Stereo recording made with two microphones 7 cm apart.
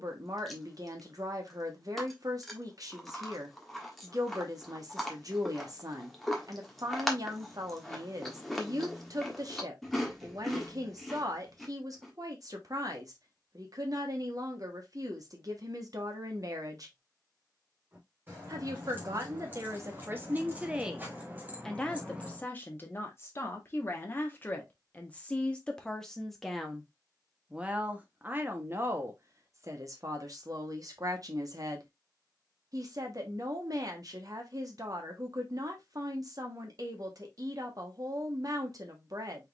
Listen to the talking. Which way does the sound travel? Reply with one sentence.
In this clip you hear the talking go left and come back.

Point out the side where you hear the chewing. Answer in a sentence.
You can hear the chewing in the centre.